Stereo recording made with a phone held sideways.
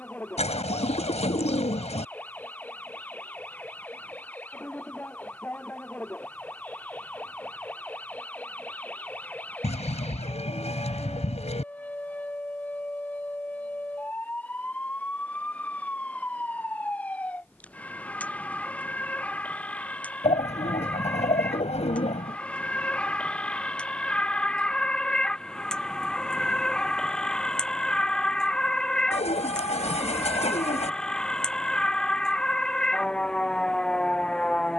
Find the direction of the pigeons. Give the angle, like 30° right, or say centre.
50° left.